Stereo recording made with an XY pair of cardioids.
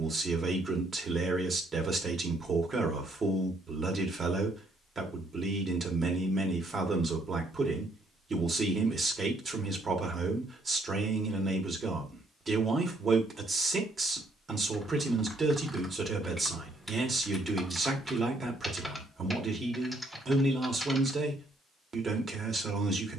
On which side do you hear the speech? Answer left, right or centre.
right.